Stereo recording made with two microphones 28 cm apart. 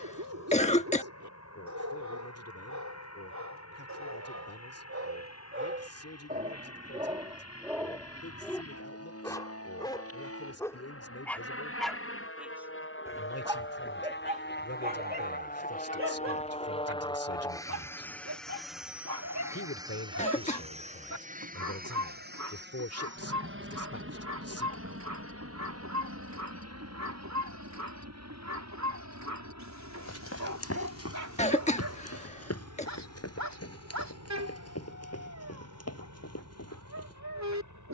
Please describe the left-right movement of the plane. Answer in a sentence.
You can hear the plane move to the right.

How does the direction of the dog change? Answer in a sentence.
You can hear the dog go left and come back.